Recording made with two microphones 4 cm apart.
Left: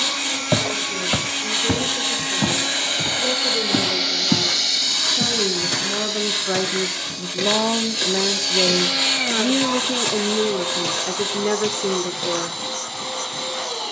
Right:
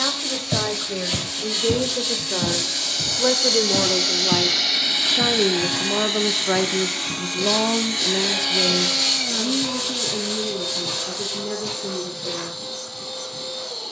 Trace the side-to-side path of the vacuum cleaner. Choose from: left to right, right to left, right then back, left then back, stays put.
right then back.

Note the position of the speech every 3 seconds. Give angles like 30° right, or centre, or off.
50° right, 30° right, 10° left, 60° left, 70° left.